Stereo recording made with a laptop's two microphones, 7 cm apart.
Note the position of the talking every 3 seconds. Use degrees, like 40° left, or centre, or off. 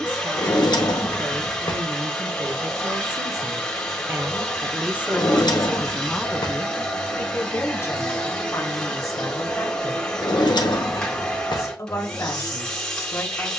70° right, 30° right, 30° left, 40° left, 40° left.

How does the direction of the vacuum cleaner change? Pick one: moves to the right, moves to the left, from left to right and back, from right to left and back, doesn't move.
doesn't move.